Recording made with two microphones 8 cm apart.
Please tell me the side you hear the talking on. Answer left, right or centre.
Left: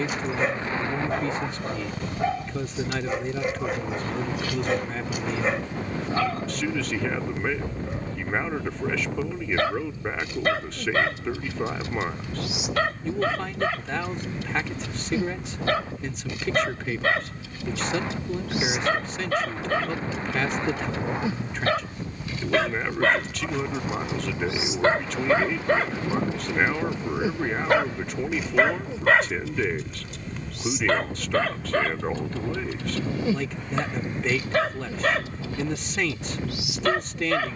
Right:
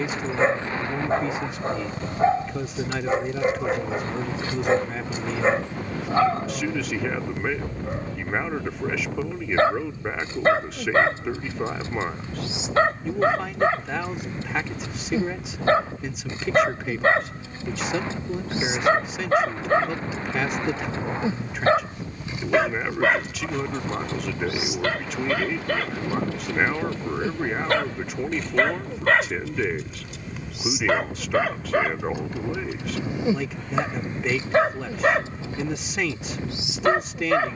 centre.